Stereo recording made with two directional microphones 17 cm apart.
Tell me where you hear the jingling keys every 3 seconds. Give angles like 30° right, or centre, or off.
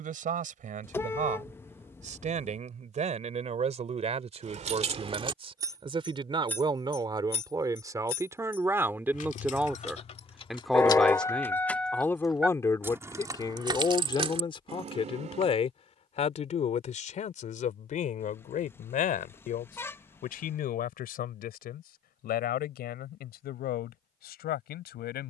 off, 40° right, 40° left, 30° left, 20° right, 40° right, off, off, off.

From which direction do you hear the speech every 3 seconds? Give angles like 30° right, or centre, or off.
50° right, 40° right, 20° right, centre, 20° left, 40° left, 50° left, 60° left, 70° left.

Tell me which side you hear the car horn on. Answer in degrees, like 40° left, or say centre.
10° left.